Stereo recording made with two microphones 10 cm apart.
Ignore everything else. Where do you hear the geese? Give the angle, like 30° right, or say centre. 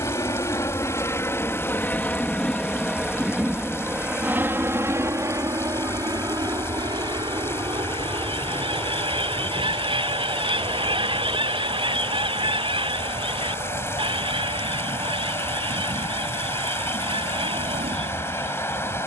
60° right.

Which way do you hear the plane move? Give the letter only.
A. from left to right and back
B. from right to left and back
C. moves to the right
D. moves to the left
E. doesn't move
C.